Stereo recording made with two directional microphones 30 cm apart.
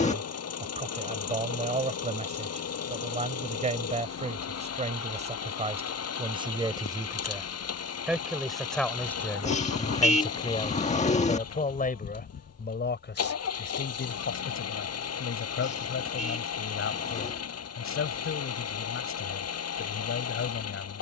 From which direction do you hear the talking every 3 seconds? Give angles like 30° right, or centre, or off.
20° right, 20° right, 10° right, 20° left, 40° left, 50° left, 50° left.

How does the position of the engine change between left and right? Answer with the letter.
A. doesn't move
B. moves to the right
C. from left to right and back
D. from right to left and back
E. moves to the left
A.